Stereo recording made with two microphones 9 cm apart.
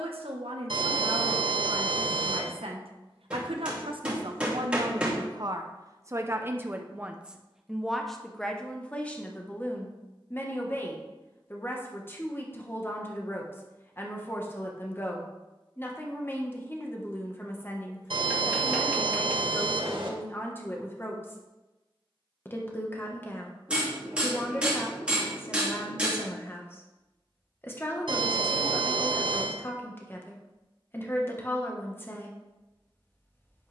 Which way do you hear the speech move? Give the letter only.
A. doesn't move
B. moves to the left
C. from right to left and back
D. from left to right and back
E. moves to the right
B.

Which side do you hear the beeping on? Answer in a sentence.
In this clip you hear the beeping on the right.